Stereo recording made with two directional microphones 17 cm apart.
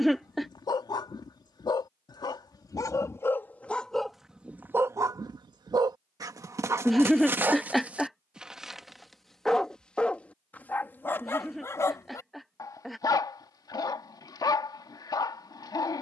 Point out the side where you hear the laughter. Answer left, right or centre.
centre.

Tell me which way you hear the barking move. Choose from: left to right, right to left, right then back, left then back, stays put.
right then back.